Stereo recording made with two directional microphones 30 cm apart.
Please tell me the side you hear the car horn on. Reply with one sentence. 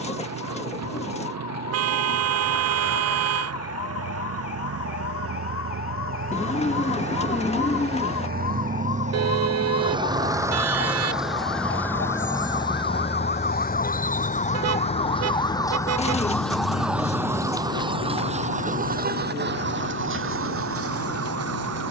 You can hear the car horn on the right.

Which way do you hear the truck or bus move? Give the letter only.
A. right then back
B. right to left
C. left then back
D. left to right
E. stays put
B.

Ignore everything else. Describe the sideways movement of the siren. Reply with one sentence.
In this clip you hear the siren move from left to right.